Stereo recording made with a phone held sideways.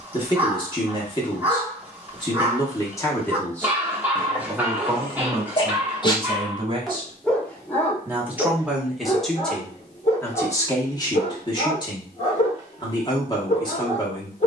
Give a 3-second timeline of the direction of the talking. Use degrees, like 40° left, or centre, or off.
30° left, 10° right, 20° right, 20° left, 30° left.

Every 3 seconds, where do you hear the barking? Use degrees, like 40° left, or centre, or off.
10° right, 10° right, 10° left, 40° left, 40° left.